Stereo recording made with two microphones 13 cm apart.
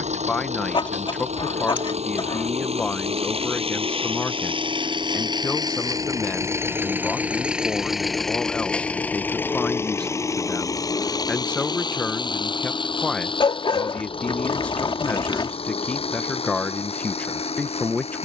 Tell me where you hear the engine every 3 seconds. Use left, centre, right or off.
right, right, centre, left, left, left.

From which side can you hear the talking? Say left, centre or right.
centre.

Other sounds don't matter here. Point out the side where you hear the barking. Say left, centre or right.
left.